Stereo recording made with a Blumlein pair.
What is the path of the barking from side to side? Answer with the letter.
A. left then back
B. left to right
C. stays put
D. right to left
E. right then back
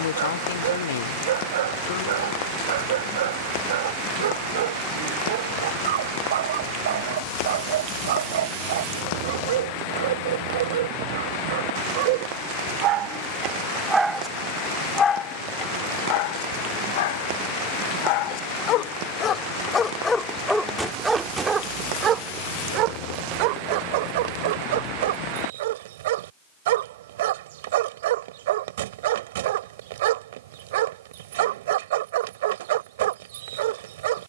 A.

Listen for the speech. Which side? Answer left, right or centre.
left.